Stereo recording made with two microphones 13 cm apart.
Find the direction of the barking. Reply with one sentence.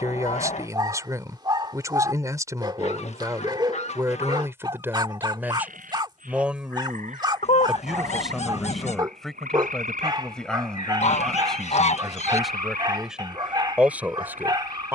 You can hear the barking on the right.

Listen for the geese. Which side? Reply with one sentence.
In this clip you hear the geese on the left.